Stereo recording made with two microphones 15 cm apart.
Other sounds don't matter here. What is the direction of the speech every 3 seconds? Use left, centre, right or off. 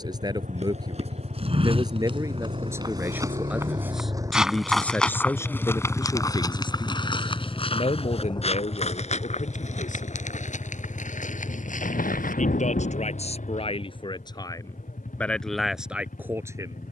right, centre, left, left, left, centre.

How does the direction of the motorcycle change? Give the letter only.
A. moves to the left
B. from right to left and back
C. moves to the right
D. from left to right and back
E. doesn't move
A.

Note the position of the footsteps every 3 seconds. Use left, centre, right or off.
right, centre, left, left, left, off.